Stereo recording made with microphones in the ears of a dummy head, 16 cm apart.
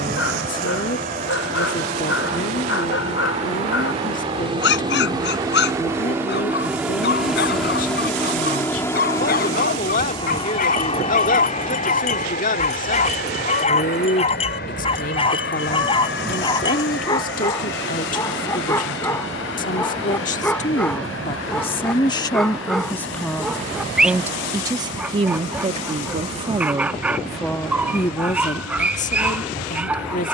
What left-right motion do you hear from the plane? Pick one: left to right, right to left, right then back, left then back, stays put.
right to left.